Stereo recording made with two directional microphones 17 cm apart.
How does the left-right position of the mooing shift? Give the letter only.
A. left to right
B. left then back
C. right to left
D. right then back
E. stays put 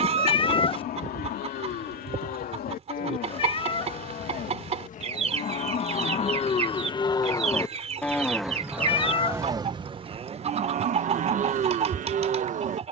A.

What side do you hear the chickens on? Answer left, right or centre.
right.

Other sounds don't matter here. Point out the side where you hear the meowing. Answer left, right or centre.
left.